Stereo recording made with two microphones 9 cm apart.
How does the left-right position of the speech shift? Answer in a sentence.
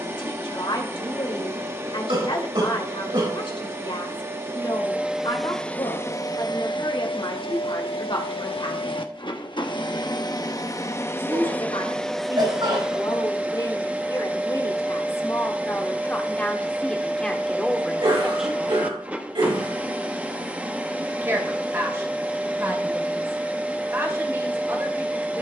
In this clip you hear the speech move to the right.